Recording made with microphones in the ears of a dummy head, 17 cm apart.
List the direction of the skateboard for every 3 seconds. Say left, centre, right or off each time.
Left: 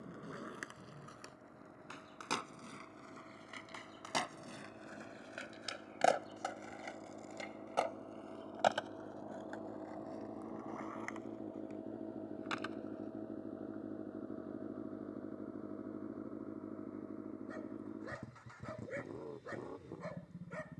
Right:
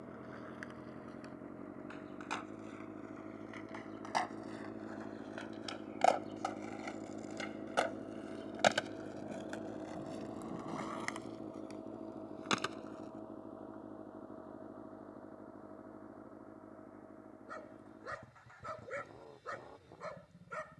left, left, centre, right, right, off, off.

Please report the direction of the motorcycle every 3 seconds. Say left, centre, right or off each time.
right, right, right, centre, left, left, left.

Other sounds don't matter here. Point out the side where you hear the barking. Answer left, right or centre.
centre.